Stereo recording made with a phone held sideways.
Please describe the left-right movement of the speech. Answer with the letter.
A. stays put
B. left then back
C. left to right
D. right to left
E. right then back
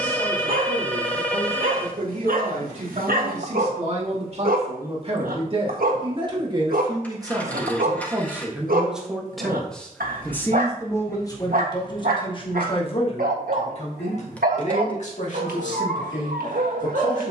D.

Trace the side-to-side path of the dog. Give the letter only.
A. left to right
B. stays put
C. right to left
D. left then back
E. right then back
B.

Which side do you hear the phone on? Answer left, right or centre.
centre.